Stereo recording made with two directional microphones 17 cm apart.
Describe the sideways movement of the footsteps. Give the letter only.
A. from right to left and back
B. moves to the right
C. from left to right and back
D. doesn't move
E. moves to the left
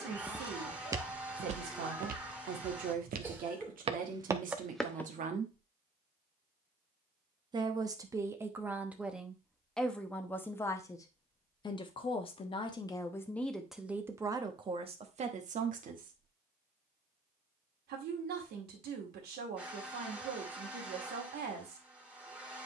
C.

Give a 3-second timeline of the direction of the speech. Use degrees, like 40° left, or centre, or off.
60° right, 50° right, 20° right, 10° left, centre, 50° right, 70° right, 70° right.